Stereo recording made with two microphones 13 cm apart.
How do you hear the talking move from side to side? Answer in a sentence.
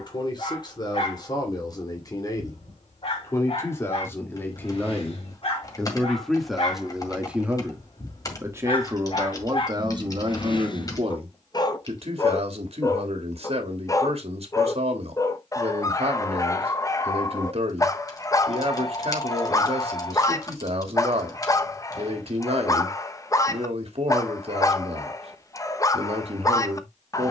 In this clip you hear the talking move to the right.